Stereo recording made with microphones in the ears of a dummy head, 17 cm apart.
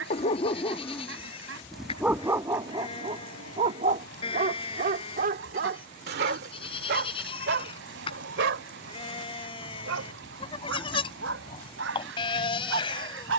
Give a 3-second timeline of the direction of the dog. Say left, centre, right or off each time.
centre, right, right, right, right.